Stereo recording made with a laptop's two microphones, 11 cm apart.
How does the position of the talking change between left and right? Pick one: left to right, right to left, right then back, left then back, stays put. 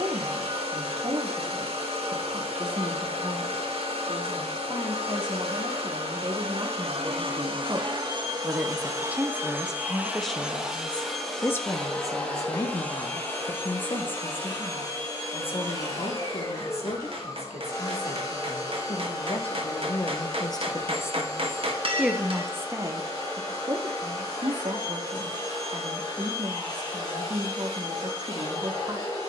left then back.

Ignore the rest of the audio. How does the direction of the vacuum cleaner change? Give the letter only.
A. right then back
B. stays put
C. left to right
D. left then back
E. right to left
E.